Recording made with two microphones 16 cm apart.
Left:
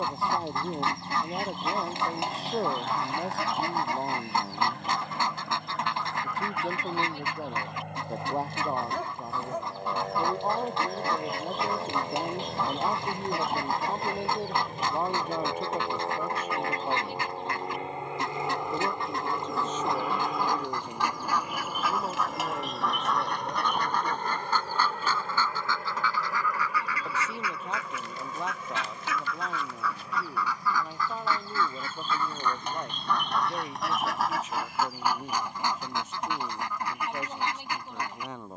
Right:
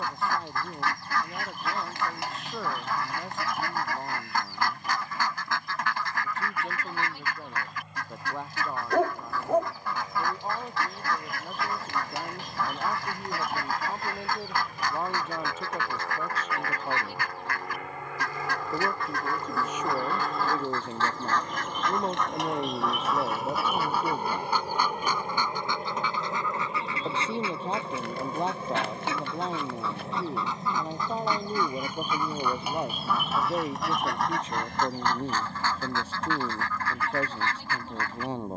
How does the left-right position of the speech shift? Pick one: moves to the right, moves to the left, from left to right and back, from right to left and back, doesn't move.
moves to the right.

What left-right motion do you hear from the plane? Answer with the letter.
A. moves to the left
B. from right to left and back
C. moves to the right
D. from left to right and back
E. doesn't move
C.